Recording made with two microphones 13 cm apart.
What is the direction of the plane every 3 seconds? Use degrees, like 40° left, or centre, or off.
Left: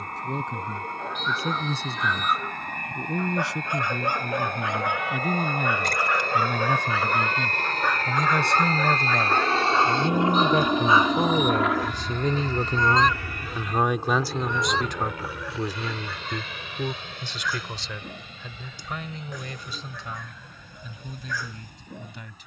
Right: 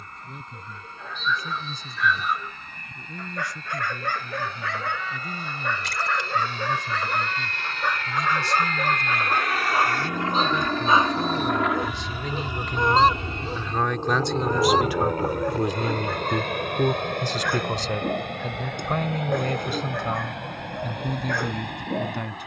70° left, 70° left, 50° left, 20° left, 20° right, 50° right, 60° right, 60° right.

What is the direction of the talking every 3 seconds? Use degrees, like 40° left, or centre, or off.
80° left, 80° left, 70° left, 60° left, 20° left, 30° right, 60° right, 60° right.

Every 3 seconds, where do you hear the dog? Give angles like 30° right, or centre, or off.
30° left, 20° left, centre, 20° right, 40° right, 50° right, 60° right, 60° right.